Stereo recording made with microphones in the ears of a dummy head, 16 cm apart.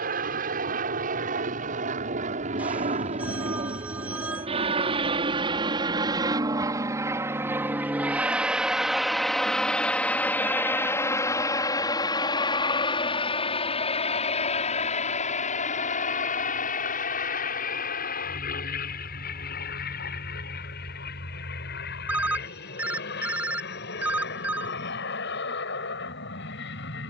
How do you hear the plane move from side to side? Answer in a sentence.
You can hear the plane travel towards the left.